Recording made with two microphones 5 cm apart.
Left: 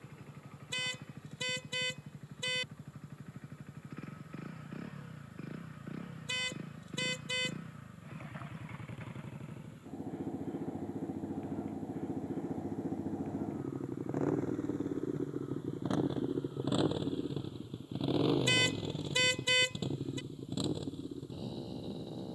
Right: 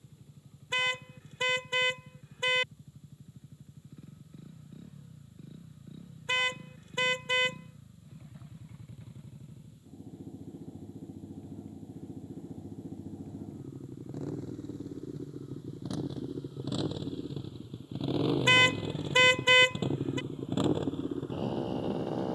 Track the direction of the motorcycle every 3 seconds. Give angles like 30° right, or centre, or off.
70° left, 60° left, 60° left, 60° left, 50° left, 20° left, 20° right, 50° right.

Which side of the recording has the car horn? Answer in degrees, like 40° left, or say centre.
40° right.